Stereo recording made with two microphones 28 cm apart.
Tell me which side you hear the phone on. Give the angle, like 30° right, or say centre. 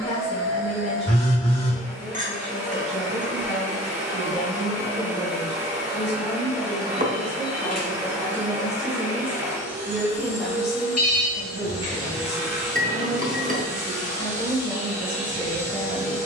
60° left.